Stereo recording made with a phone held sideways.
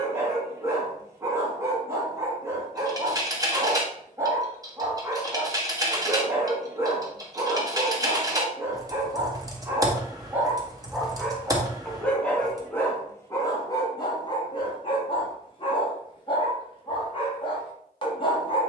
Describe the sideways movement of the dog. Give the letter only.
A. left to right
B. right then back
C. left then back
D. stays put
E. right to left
E.